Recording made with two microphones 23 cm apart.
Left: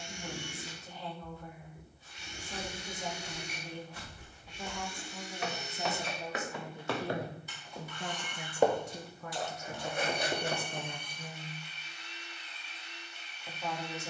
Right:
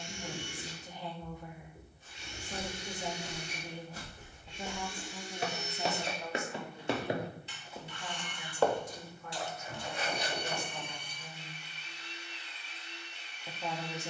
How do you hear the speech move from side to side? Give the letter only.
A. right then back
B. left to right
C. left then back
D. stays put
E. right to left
C.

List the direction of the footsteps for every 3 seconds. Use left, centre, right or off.
right, right, centre, left, off.